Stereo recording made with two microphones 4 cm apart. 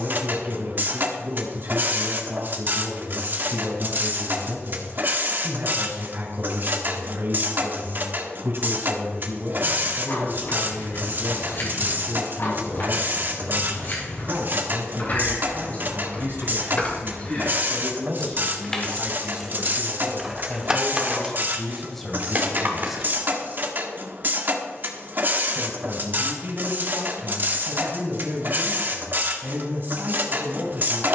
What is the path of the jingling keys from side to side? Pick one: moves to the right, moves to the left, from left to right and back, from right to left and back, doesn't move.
moves to the right.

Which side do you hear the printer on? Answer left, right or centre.
right.